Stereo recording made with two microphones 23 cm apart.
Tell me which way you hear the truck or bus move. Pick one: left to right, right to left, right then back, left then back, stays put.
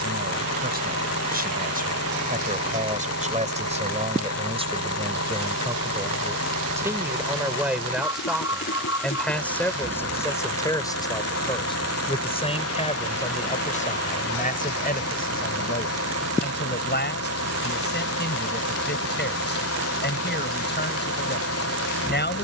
stays put.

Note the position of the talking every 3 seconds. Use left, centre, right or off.
right, right, centre, centre, left, left, left, left.